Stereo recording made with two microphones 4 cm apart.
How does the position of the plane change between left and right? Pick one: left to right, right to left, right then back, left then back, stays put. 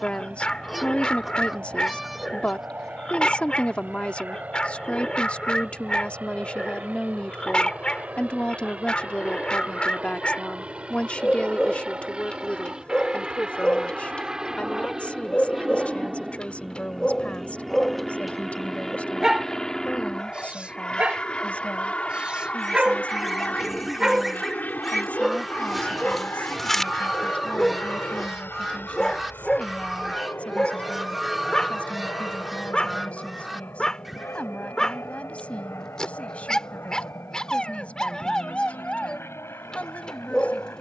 right to left.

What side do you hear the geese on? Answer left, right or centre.
centre.